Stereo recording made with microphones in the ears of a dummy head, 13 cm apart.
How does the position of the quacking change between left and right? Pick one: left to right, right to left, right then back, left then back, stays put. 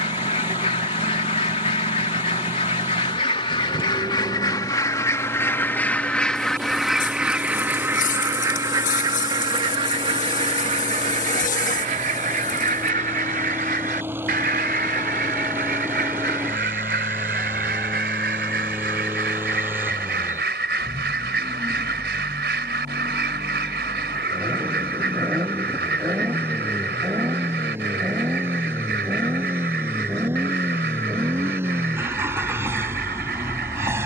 left to right.